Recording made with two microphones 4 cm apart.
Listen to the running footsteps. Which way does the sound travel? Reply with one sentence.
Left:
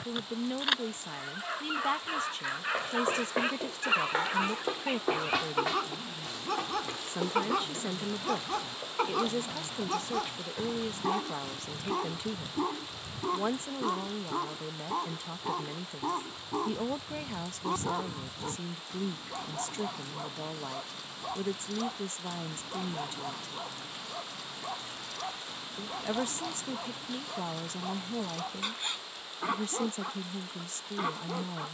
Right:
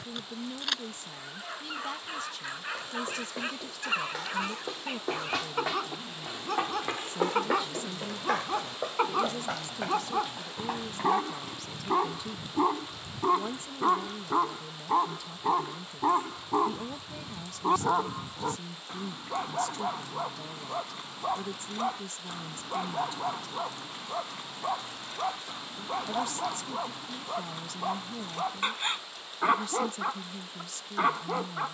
You can hear the running footsteps move from left to right.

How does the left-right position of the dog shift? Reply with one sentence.
You can hear the dog go from the left side to the right.